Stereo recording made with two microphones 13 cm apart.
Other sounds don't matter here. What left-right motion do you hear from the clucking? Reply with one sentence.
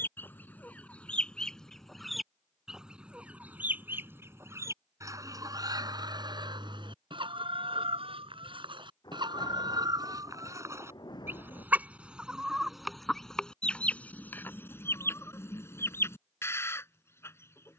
In this clip you hear the clucking move from left to right and back again.